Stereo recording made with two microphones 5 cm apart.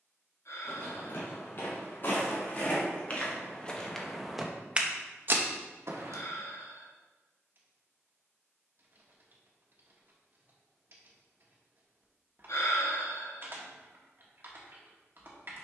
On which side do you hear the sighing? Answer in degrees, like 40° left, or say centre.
70° left.